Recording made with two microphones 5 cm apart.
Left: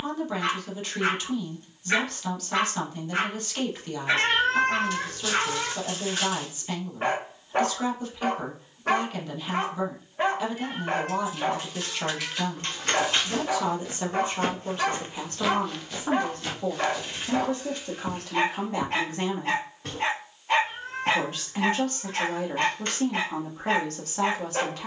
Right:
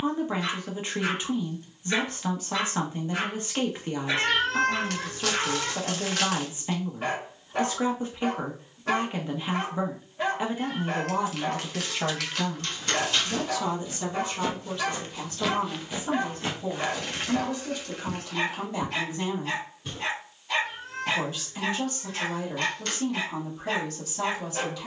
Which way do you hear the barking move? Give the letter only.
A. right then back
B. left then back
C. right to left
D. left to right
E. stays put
E.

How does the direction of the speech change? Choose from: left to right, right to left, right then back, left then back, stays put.
right to left.